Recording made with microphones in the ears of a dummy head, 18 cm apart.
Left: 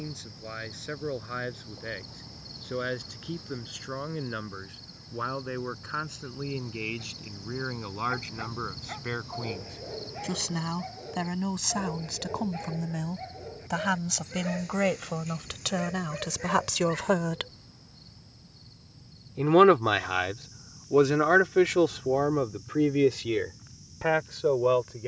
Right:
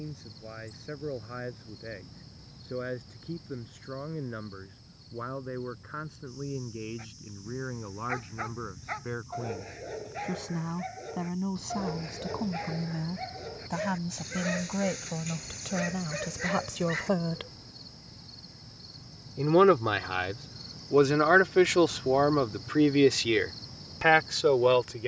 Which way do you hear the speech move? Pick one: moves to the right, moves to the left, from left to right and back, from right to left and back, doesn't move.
moves to the right.